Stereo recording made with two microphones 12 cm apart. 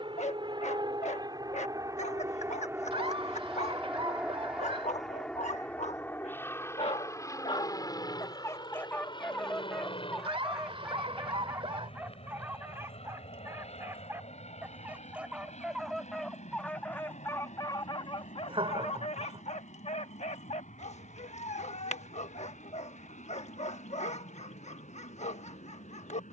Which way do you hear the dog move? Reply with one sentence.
In this clip you hear the dog go right and come back.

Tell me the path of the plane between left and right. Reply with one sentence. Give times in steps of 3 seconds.
In this clip you hear the plane on the right from 0 s, in the centre from 3 s and on the left from 6 s.